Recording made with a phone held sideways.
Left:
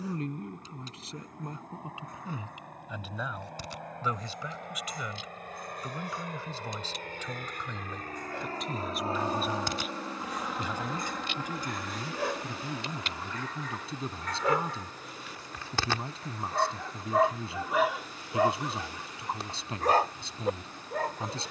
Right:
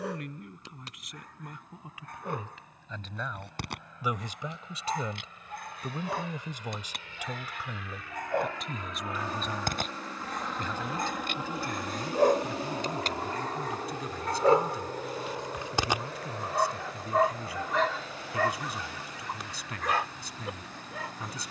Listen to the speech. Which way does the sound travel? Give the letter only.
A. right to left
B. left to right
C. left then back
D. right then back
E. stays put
D.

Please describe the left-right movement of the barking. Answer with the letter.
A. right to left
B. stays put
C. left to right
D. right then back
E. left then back
A.